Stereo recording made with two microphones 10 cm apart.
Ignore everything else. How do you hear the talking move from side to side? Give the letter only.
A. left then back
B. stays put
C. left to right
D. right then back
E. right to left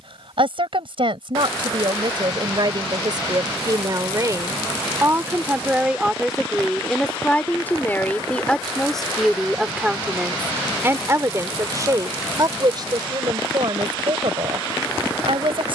A.